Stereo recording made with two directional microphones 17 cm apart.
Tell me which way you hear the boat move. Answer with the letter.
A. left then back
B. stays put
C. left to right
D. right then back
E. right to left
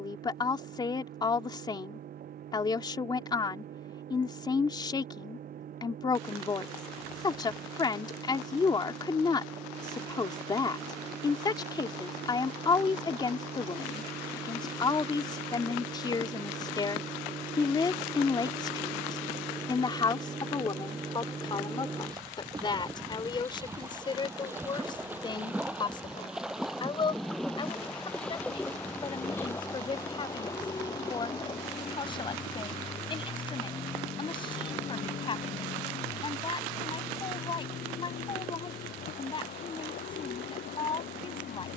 E.